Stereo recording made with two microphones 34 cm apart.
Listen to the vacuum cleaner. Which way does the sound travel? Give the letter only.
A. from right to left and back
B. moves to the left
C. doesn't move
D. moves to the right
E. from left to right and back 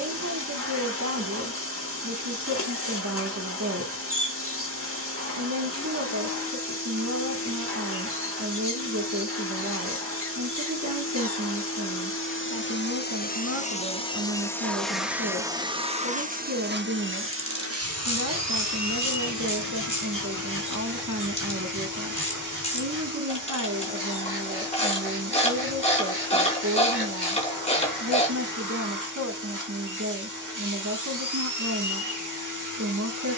D.